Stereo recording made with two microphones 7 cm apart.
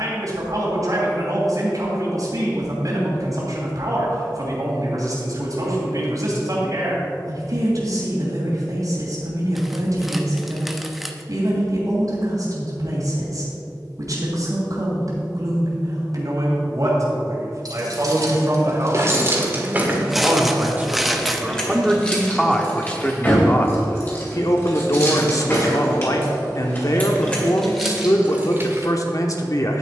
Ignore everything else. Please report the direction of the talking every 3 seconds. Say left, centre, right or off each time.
right, right, right, right, right, right, right, centre, left, left.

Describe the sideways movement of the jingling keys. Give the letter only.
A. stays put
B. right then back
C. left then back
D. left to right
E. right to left
C.